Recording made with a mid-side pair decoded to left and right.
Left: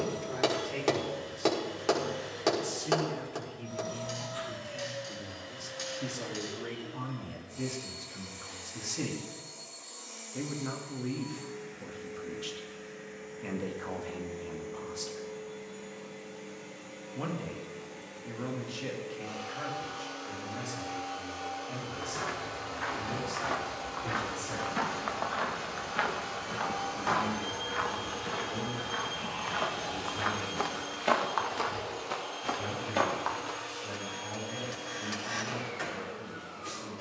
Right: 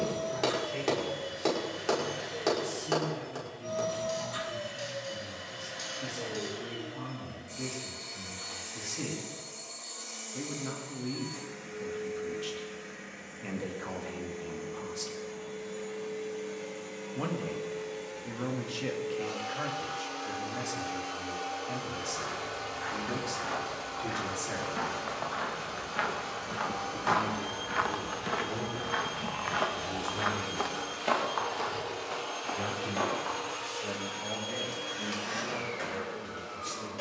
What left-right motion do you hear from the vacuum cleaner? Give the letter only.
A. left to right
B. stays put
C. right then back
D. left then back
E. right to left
D.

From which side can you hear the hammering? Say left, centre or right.
left.